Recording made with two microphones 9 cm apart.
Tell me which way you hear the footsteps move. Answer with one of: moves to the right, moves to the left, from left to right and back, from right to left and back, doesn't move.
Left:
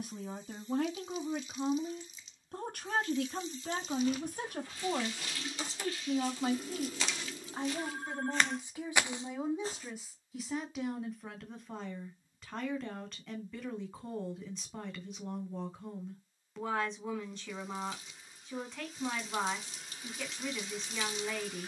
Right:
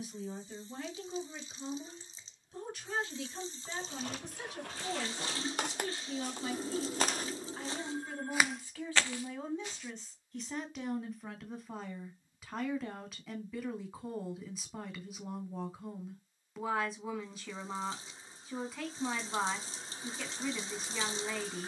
moves to the left.